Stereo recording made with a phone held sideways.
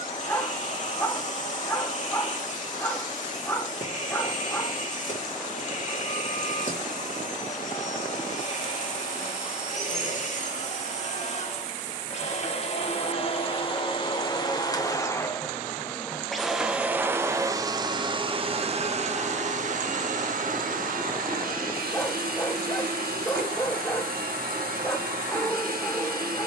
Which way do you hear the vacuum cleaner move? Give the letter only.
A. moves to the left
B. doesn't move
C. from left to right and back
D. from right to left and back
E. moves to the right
E.